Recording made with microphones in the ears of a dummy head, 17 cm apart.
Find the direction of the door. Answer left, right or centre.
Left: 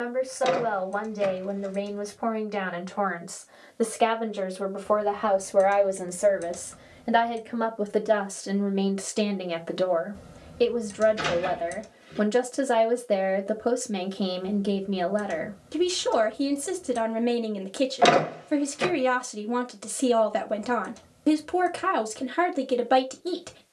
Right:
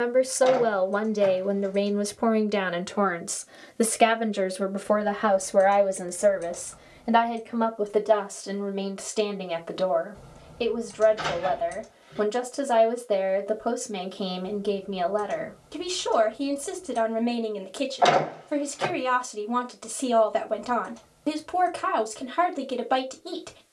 left.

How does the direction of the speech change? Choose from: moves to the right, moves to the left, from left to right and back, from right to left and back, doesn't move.
moves to the left.